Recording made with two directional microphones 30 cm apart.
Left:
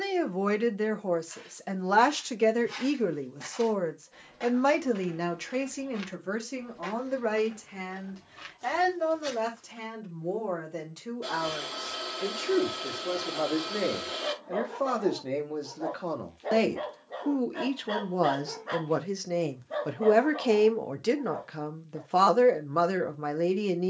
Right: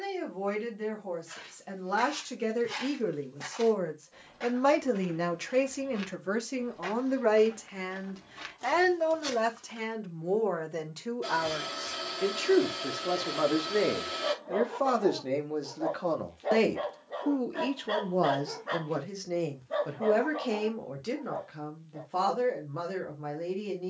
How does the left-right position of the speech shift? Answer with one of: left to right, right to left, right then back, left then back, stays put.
right then back.